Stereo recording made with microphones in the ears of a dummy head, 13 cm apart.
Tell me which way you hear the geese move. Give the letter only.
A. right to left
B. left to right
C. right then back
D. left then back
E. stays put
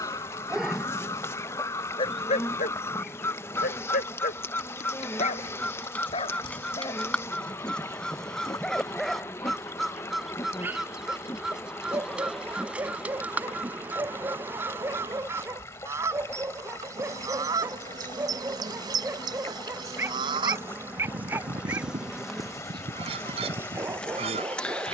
B.